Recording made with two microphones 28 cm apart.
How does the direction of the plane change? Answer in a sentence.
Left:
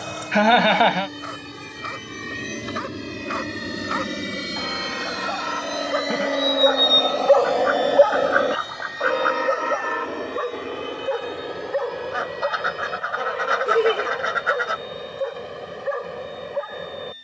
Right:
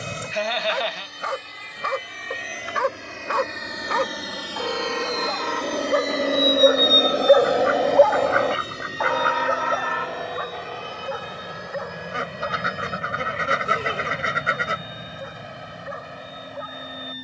You can hear the plane travel towards the right.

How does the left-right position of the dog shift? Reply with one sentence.
You can hear the dog travel towards the left.